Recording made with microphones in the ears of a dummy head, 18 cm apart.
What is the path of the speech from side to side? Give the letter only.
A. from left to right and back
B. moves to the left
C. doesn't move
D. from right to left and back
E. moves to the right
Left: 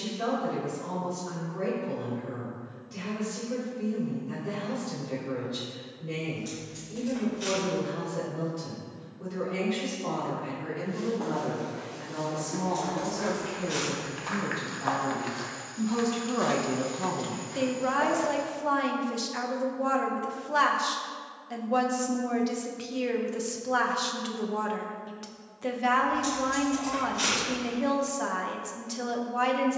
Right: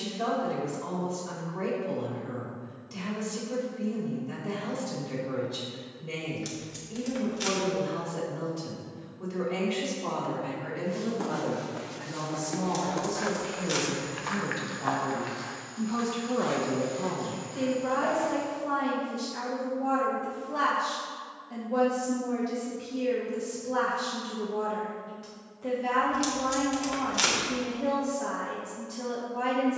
B.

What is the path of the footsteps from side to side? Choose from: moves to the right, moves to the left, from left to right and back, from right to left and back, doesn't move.
moves to the left.